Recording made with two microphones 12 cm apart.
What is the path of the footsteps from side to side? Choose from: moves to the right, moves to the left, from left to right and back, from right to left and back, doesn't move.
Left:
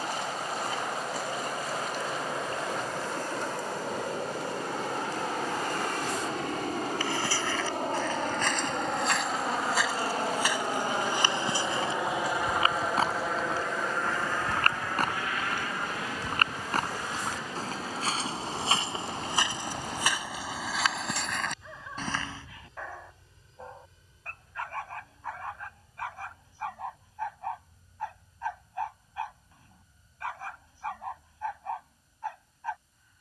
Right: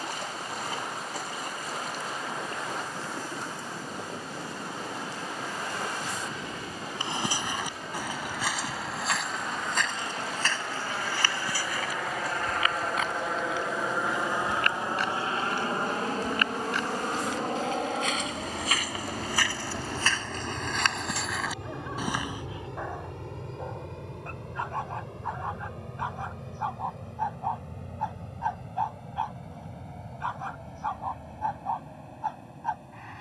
from right to left and back.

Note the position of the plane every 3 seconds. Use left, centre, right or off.
left, left, left, left, centre, right, right, right, right, right, right.